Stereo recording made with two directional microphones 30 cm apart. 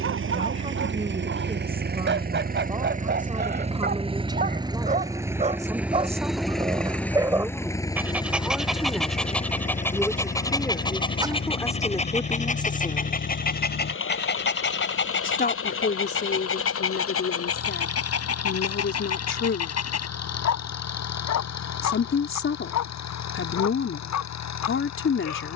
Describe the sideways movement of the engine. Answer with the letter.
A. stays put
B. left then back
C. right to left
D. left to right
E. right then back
C.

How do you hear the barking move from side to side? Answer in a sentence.
In this clip you hear the barking travel towards the left.